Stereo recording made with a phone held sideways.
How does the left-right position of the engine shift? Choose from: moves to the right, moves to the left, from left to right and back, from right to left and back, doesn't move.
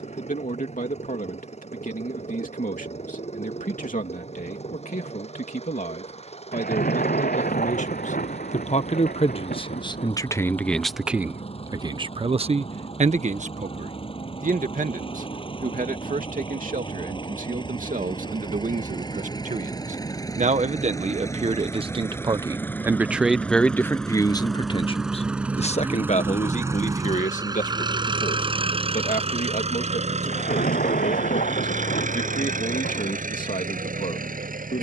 moves to the right.